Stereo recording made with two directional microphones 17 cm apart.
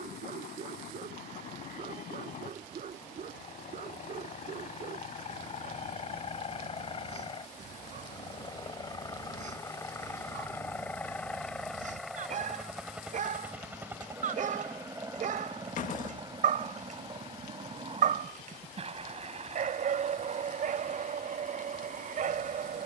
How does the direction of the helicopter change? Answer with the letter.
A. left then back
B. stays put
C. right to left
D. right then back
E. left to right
E.